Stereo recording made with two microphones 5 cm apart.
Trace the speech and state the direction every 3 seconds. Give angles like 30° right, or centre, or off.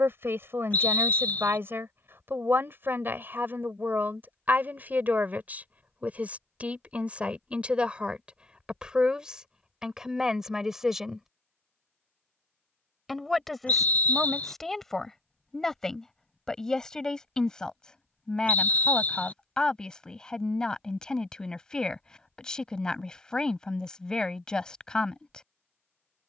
60° right, 40° right, 30° right, 10° right, centre, 10° left, 20° left, 20° left, 20° left.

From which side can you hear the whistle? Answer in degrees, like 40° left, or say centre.
40° left.